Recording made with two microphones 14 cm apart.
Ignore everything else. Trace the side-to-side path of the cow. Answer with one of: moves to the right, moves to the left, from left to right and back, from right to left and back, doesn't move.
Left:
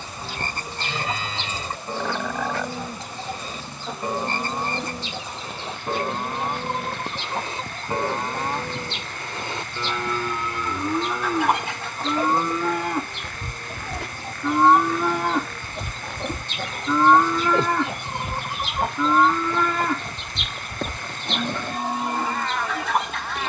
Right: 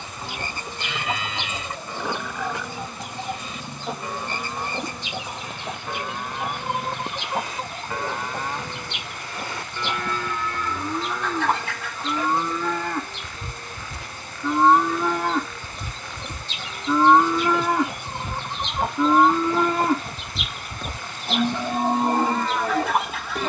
moves to the right.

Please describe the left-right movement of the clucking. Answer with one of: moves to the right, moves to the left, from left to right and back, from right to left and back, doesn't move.
from right to left and back.